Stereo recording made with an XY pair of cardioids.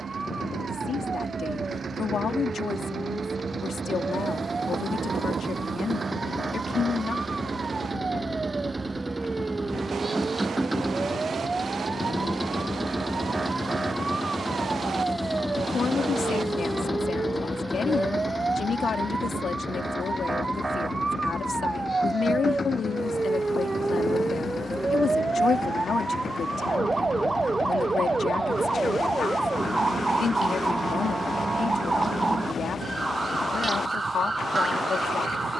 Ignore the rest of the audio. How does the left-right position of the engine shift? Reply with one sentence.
In this clip you hear the engine move to the left.